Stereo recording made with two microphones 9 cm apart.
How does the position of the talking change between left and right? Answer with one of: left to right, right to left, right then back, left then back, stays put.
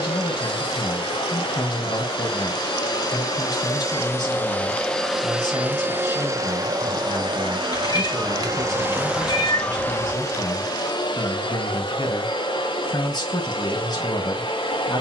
stays put.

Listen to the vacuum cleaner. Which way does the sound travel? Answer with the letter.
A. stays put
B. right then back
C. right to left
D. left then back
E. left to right
B.